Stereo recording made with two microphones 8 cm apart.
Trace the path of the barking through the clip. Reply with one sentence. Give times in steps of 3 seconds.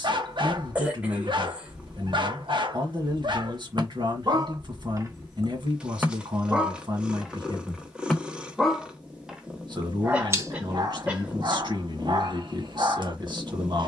You can hear the barking on the right from 0 s, in the centre from 6 s and on the right from 9 s.